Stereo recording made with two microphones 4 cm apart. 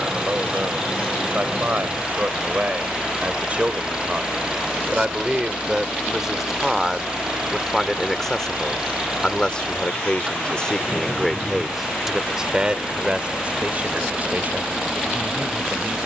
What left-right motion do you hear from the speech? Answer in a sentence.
You can hear the speech move from right to left and back again.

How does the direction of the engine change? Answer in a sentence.
In this clip you hear the engine stay in one place.